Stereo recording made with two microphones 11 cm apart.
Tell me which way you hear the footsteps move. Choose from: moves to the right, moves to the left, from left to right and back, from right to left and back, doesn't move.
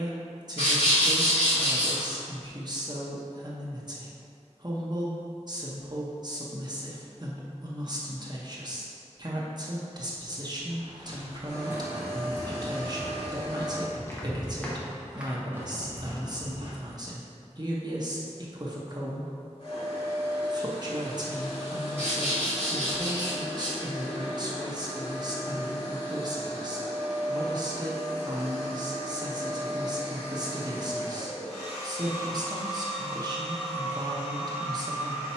from right to left and back.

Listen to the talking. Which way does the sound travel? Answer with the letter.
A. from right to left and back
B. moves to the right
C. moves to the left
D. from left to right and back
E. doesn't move
E.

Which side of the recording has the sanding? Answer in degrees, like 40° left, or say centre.
60° left.